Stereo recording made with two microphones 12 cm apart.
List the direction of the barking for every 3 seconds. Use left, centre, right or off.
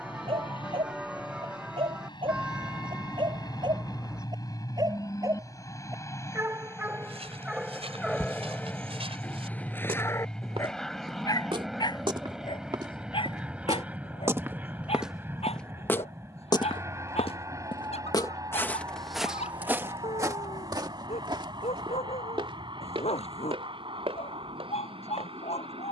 right, right, centre, left, left, left, left, left, left.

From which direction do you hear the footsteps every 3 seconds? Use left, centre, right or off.
off, off, right, right, right, left, centre, right, right.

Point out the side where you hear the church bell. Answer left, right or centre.
centre.